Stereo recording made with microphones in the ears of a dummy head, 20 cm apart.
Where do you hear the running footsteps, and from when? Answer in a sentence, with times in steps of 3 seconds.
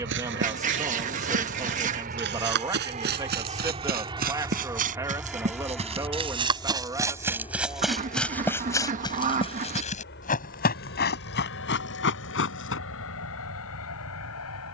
You can hear the running footsteps on the right from 0 s, in the centre from 6 s and on the left from 9 s.